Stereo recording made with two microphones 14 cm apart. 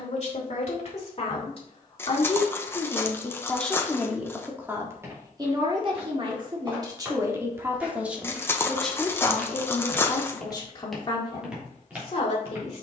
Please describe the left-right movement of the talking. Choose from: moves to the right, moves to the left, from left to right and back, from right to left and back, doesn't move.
from left to right and back.